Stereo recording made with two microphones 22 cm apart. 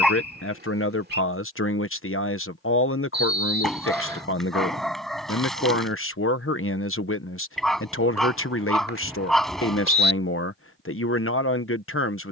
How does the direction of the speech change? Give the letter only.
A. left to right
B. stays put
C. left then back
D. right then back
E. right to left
B.